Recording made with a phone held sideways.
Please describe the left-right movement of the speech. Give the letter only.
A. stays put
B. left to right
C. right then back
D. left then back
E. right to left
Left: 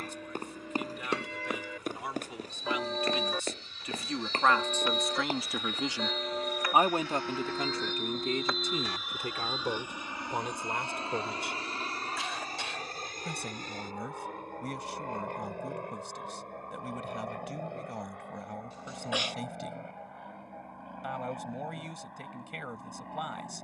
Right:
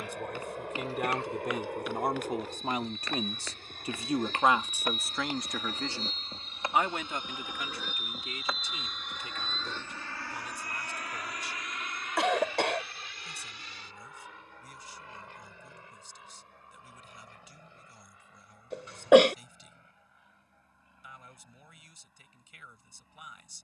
E.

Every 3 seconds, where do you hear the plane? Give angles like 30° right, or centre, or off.
70° right, 50° right, 20° right, 20° left, 40° left, 50° left, 60° left, 60° left.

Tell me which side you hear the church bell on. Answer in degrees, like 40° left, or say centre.
80° left.